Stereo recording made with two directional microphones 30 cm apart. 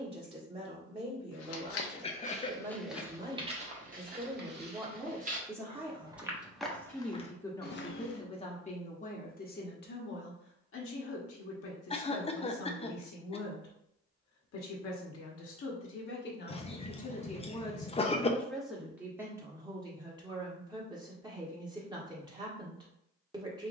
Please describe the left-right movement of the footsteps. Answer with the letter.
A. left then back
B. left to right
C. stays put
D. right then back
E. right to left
D.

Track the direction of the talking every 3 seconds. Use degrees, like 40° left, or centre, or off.
20° right, 10° right, 10° left, 40° left, 60° left, 30° left, 10° right, 10° right.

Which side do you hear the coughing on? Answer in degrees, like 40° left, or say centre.
20° left.